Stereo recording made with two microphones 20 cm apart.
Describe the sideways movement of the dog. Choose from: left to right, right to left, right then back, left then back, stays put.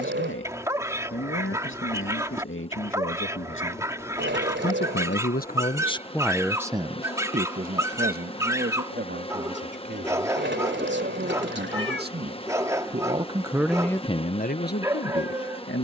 stays put.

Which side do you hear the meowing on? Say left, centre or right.
right.